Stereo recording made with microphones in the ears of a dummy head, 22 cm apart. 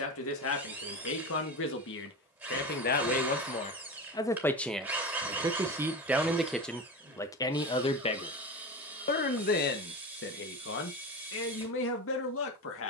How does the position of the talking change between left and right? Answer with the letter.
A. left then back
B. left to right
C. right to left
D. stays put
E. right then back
E.